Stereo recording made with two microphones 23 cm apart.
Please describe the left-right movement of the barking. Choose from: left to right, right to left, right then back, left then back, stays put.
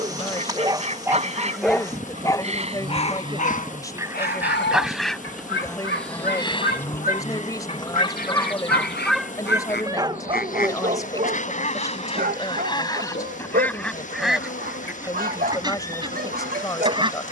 left then back.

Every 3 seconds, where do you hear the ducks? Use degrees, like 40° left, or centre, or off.
30° right, 10° right, 30° left, 40° left, 10° left, 20° right.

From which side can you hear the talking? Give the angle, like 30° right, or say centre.
10° left.